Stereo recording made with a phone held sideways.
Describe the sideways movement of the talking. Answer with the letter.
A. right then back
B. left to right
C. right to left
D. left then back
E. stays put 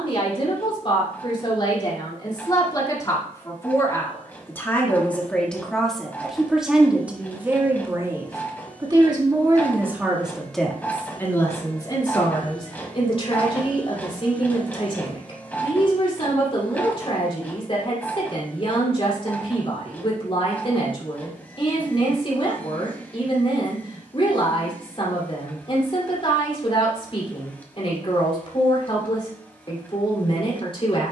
A.